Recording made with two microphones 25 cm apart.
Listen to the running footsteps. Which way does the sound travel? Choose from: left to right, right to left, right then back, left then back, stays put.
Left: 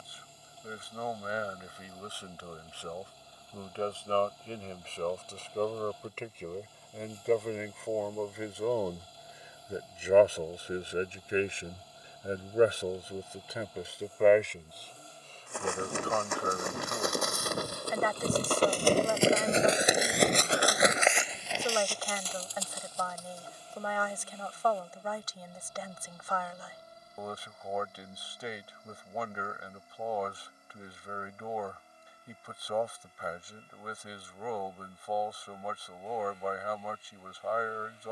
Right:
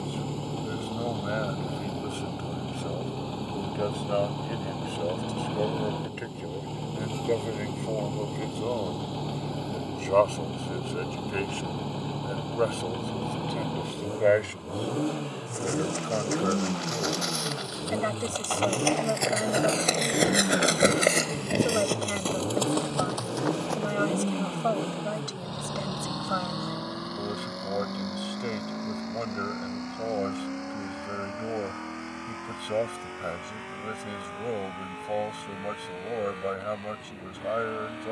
left to right.